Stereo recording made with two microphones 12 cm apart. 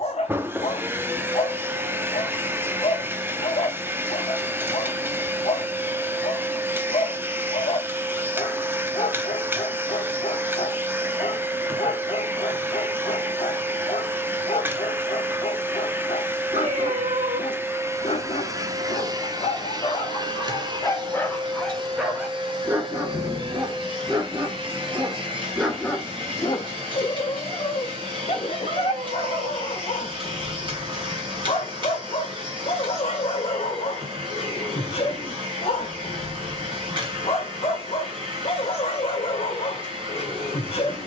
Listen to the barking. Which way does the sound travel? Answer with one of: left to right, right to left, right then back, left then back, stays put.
right then back.